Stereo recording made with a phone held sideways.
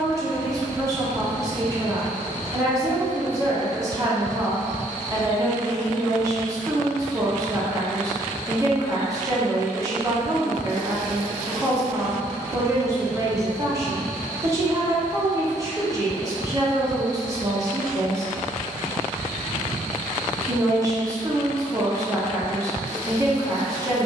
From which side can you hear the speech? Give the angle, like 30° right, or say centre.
20° right.